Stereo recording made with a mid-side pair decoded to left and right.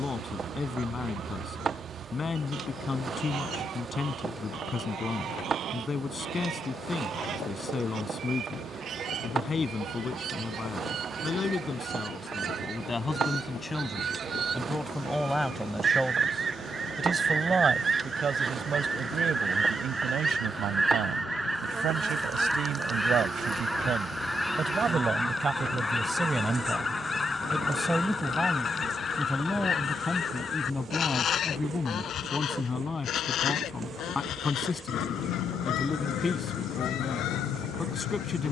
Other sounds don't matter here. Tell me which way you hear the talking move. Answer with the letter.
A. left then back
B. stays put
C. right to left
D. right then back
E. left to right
D.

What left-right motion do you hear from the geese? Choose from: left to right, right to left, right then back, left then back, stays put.
right to left.